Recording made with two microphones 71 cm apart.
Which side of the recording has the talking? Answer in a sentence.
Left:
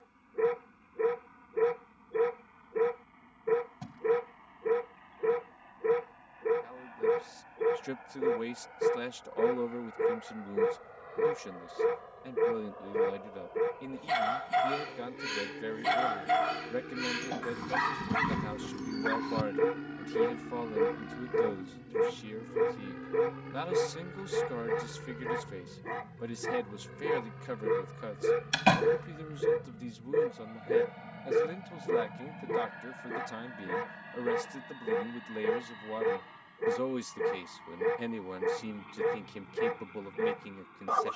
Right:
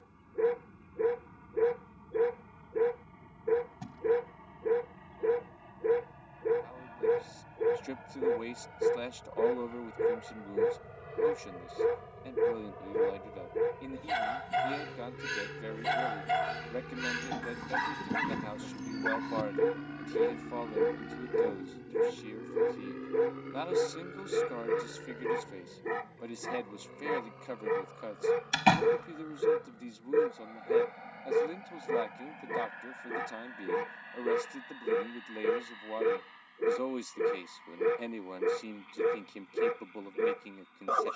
You can hear the talking on the left.